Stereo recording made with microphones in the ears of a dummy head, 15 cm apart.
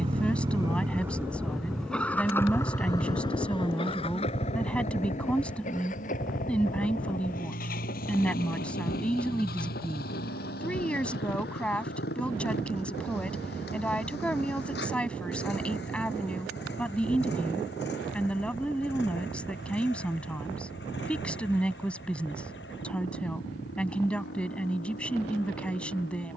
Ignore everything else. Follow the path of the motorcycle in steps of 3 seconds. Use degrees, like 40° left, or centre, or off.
centre, 40° left, 50° left, 60° left, 60° left, 70° left, 70° left, 70° left, 70° left.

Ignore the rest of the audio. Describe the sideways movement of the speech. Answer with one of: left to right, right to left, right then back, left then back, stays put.
stays put.